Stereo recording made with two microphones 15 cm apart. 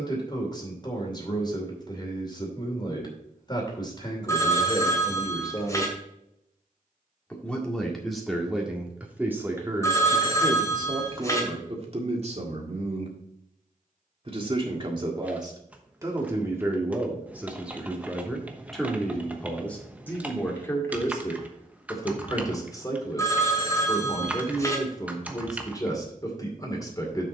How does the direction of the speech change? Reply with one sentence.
In this clip you hear the speech go right and come back.